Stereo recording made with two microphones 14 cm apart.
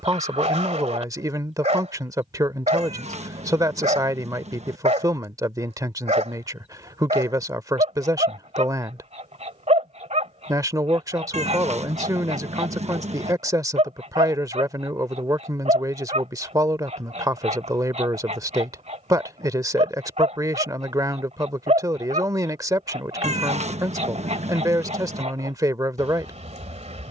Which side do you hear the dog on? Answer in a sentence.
In this clip you hear the dog on the right.